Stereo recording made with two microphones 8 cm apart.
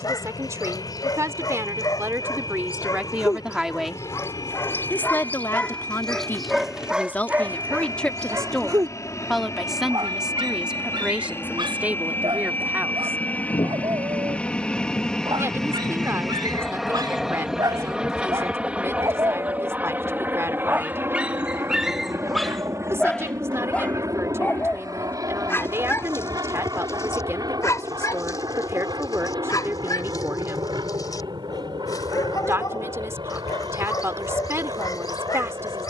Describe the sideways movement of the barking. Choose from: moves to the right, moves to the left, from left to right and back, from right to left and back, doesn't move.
from left to right and back.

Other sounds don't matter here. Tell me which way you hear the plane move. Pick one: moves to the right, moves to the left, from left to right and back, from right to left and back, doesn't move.
moves to the right.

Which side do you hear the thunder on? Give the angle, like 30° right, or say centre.
60° left.